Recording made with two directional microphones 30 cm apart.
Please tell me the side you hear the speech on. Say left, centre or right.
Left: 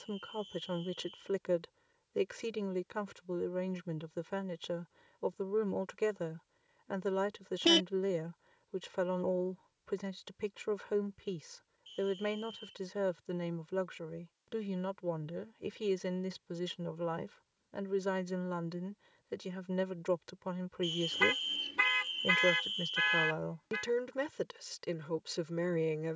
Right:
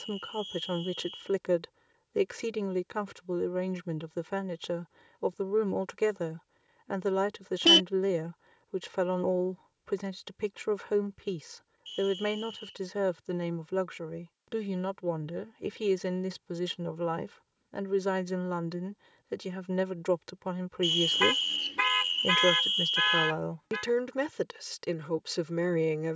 right.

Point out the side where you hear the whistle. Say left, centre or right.
right.